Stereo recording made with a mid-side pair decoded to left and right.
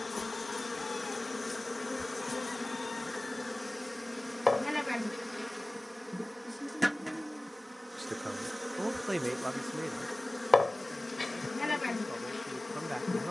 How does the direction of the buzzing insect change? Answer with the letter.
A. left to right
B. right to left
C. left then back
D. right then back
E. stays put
D.